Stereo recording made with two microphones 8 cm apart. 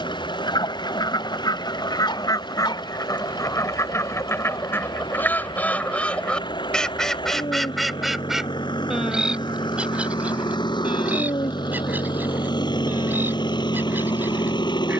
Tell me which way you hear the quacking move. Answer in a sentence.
In this clip you hear the quacking travel towards the right.